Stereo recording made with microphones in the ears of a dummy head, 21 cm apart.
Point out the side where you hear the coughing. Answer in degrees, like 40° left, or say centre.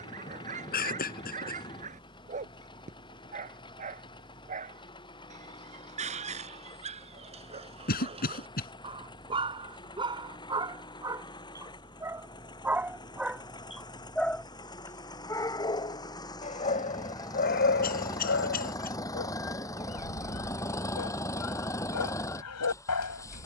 40° left.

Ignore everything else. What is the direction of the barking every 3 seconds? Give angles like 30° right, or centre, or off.
30° right, 30° right, 30° right, 20° right, centre, 30° left, 60° left, 70° left.